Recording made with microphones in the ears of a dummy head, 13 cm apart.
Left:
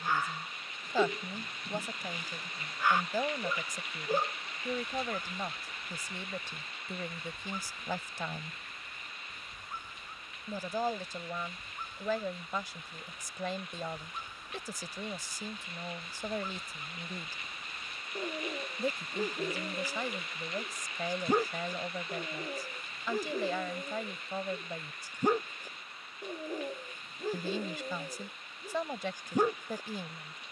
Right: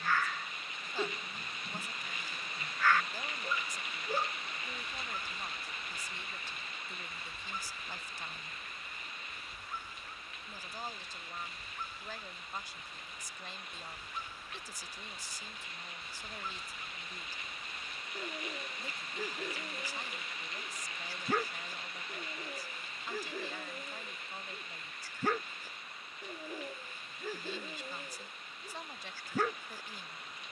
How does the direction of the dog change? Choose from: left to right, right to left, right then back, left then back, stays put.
stays put.